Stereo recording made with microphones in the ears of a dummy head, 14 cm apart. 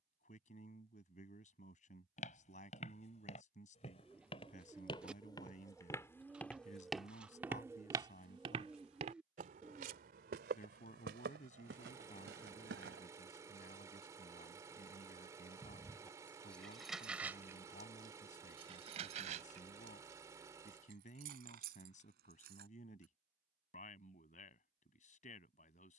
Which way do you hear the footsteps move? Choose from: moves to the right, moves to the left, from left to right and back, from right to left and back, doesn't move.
moves to the right.